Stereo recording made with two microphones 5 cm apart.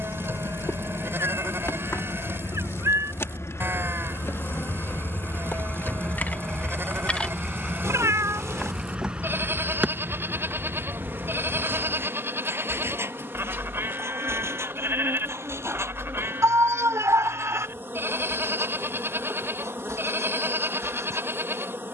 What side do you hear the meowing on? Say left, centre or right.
right.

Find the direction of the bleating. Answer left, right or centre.
right.